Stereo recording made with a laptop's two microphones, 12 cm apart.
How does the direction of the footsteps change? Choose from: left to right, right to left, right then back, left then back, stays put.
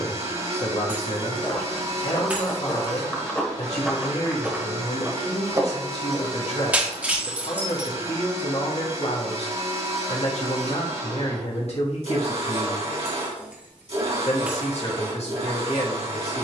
left to right.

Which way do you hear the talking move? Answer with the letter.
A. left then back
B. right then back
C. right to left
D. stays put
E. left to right
D.